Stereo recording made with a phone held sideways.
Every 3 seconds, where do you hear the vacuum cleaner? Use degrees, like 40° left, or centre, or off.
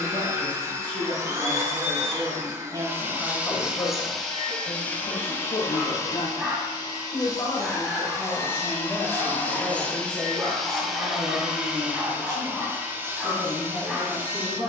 20° right, 10° left, 30° left, centre, 20° right.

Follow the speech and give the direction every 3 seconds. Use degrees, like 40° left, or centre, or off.
40° right, 40° left, 30° left, 20° right, 30° right.